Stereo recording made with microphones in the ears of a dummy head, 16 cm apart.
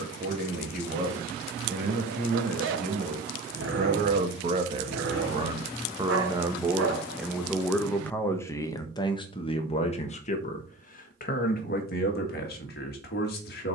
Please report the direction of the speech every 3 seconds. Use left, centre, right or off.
right, right, centre, left, left.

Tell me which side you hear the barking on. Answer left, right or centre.
right.